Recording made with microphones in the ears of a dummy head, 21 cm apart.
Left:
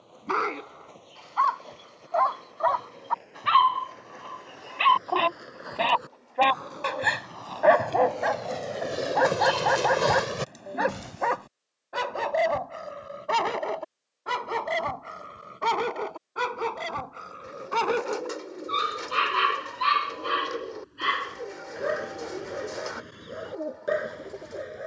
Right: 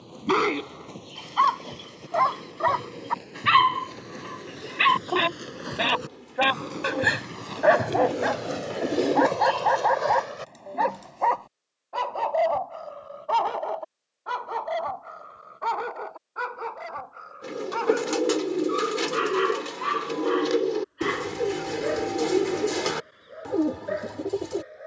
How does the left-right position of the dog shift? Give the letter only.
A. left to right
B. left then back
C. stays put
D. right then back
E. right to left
E.